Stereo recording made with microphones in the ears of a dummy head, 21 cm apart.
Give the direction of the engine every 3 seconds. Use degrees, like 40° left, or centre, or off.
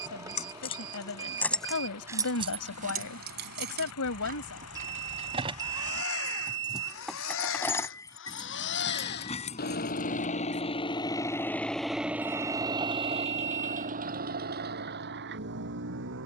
80° left, 70° left, 60° left, 30° left, 30° right, 50° right.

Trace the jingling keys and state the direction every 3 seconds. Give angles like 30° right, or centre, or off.
centre, 40° right, 10° left, 30° left, off, off.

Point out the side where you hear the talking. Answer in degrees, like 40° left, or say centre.
70° left.